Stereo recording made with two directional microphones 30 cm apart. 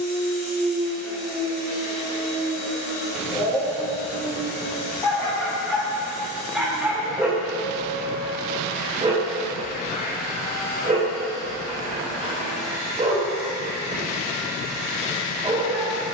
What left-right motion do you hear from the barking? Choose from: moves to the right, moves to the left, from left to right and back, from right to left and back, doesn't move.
moves to the right.